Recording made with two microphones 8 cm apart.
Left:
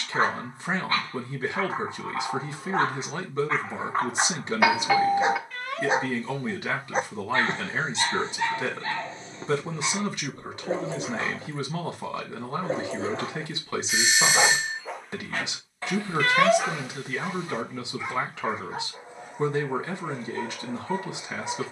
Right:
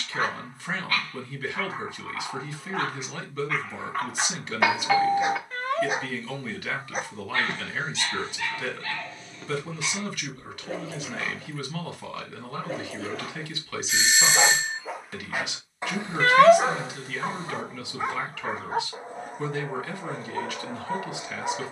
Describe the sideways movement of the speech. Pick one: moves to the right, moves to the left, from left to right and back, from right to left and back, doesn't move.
doesn't move.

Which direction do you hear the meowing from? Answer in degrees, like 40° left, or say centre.
30° right.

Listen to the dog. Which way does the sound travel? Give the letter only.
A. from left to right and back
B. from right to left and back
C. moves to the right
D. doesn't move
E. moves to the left
C.